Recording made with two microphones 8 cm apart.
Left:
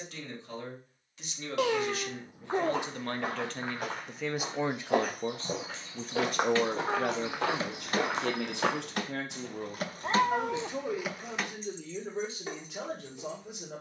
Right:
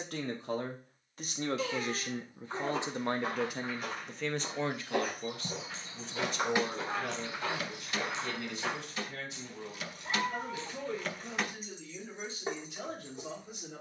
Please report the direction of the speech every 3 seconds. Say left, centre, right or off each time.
right, centre, left, left, left.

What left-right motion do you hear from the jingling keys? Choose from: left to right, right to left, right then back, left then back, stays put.
left then back.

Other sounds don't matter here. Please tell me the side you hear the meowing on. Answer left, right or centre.
left.